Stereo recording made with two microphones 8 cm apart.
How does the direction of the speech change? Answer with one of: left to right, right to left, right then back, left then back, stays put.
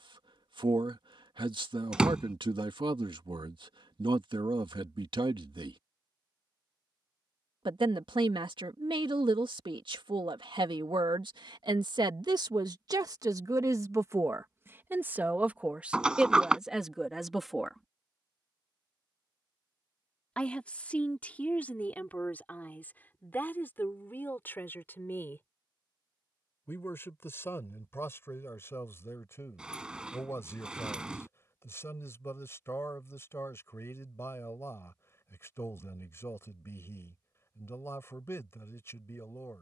right to left.